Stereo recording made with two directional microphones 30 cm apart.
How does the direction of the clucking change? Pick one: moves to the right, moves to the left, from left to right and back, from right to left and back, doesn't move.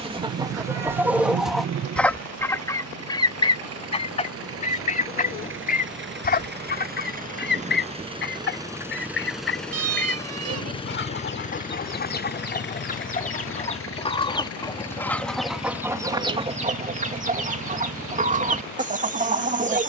from right to left and back.